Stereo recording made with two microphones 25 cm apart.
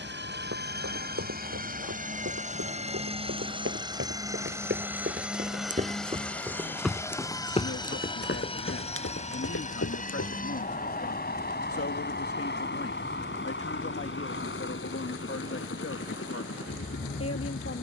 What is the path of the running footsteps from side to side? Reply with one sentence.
In this clip you hear the running footsteps move to the left.